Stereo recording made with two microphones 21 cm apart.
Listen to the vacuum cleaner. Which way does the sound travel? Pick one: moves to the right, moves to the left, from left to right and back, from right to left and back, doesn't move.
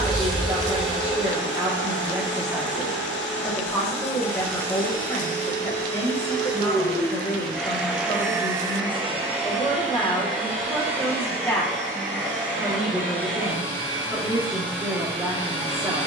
moves to the right.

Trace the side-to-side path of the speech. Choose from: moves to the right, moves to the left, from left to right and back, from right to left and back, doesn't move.
from right to left and back.